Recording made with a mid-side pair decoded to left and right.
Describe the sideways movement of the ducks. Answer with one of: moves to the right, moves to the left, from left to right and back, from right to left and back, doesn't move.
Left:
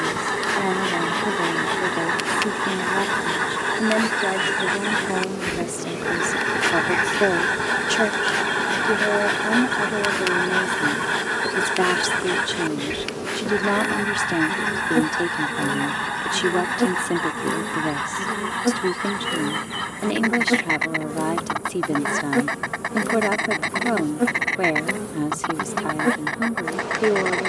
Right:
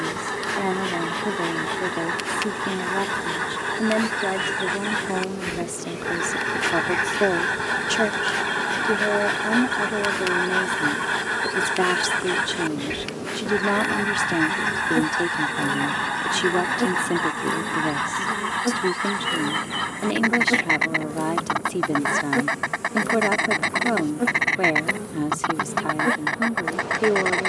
moves to the right.